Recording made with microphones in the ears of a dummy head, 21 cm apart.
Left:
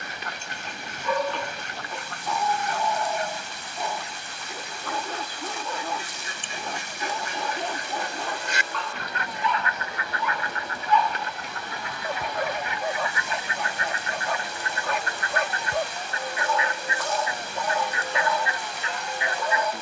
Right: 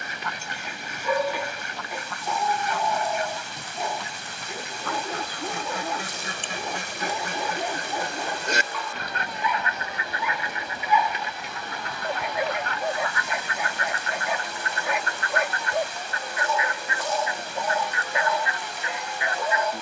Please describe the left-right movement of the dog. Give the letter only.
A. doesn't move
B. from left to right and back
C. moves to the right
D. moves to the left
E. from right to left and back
A.